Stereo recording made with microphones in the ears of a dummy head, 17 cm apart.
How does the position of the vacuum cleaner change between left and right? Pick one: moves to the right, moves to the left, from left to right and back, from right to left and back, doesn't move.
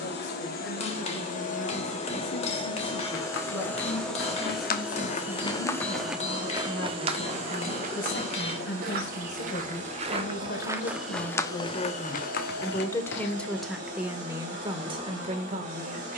moves to the right.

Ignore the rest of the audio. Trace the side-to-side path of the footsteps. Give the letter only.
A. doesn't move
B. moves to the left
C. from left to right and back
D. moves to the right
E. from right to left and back
C.